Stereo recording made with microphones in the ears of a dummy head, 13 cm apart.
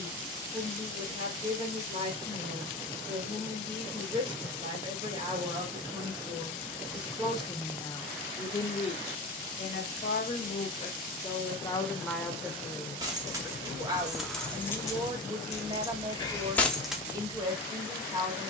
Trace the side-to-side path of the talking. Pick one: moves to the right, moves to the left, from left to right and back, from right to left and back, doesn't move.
from right to left and back.